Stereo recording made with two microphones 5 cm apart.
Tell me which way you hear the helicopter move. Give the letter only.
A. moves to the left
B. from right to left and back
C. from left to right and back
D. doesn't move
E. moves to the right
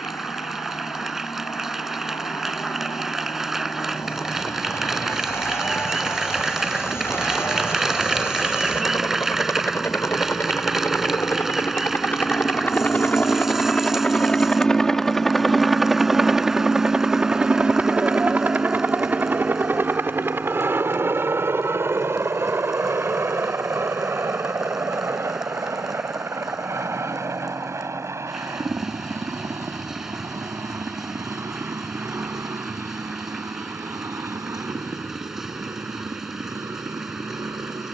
E.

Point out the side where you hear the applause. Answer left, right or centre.
centre.